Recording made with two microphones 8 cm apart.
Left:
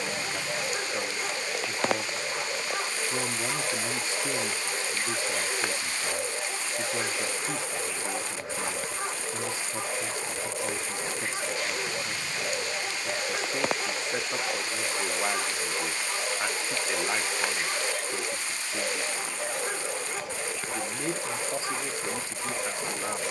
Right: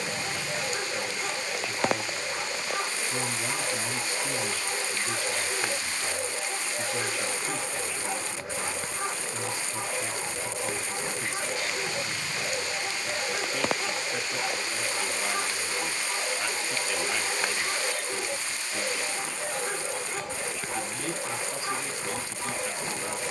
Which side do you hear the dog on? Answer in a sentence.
In this clip you hear the dog in the centre.